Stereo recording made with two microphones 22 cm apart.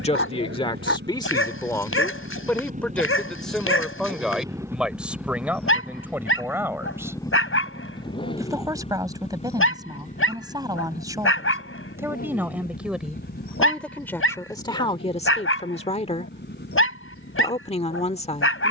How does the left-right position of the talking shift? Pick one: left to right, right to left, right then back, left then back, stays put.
right then back.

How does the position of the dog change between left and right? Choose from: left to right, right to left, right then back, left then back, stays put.
stays put.